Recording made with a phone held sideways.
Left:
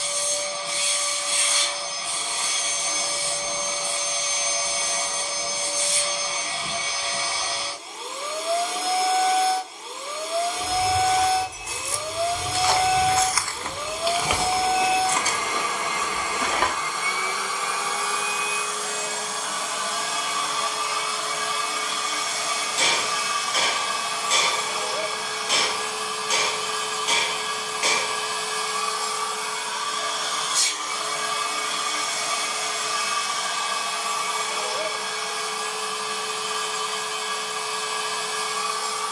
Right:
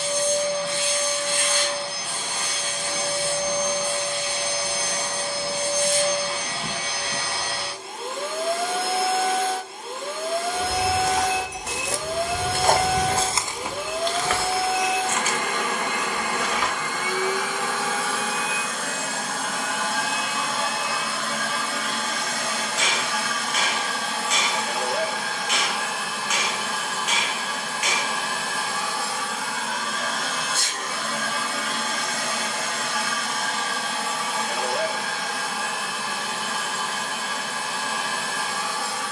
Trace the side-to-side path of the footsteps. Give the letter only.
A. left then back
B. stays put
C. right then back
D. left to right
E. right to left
E.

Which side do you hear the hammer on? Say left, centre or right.
left.